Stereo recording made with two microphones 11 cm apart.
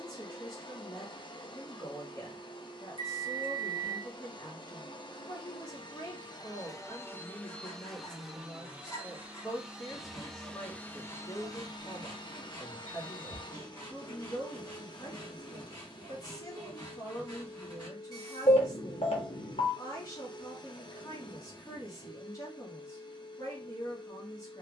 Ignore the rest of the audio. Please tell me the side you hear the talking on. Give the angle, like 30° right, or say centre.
30° left.